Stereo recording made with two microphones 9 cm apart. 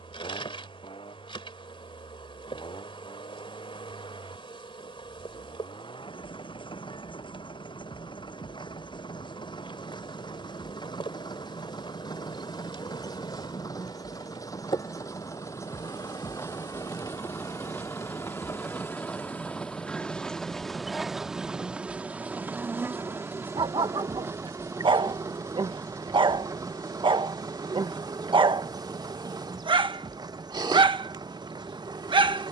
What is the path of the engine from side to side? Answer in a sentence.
In this clip you hear the engine move from left to right.